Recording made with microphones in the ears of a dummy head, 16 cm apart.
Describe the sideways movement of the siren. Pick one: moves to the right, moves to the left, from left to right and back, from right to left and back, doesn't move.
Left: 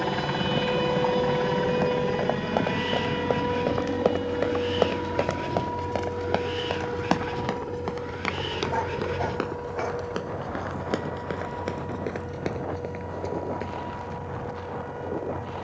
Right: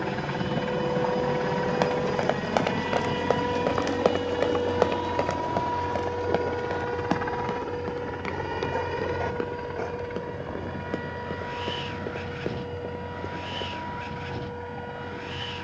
moves to the right.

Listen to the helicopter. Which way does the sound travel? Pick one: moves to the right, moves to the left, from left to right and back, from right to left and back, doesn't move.
moves to the right.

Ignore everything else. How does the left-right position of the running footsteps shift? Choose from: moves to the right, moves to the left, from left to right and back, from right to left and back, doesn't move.
moves to the left.